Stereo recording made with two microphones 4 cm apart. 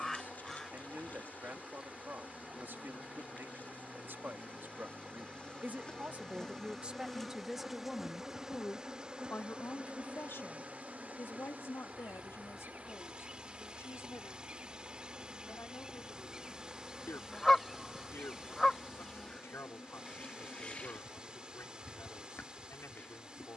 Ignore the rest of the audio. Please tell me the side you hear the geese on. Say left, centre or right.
centre.